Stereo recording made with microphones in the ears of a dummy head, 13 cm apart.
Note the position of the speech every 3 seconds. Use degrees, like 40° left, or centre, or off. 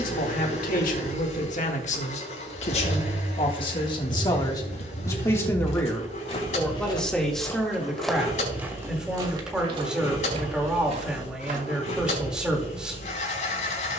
60° left, 30° left, centre, 10° right, 10° right.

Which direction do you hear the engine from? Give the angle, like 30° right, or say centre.
60° left.